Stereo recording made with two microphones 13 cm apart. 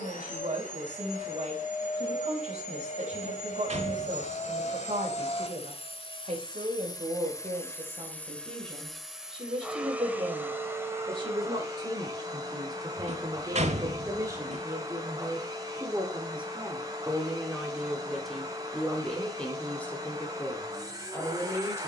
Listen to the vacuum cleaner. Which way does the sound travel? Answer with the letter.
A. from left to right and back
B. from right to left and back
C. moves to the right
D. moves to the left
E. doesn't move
C.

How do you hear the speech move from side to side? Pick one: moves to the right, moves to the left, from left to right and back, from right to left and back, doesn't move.
moves to the left.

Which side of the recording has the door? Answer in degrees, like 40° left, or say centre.
60° right.